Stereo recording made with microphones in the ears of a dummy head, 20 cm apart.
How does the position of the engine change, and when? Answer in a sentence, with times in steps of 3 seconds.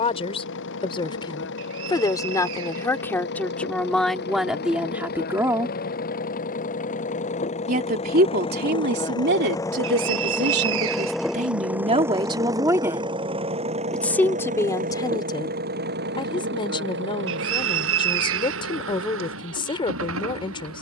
You can hear the engine on the left from 0 s, in the centre from 9 s and on the right from 12 s.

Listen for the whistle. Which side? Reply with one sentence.
You can hear the whistle on the right.